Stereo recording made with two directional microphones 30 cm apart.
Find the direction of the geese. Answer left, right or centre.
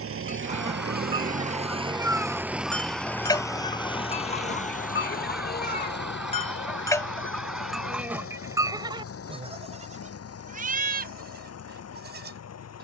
centre.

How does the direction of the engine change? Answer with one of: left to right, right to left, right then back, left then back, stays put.
right to left.